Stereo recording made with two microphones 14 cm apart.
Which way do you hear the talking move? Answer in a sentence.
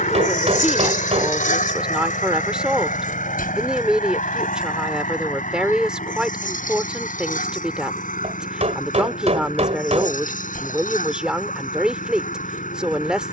In this clip you hear the talking stay in one place.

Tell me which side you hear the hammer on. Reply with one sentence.
In this clip you hear the hammer on the right.